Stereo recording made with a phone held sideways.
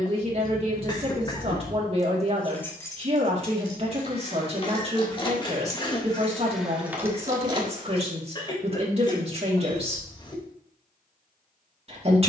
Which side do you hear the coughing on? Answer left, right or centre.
left.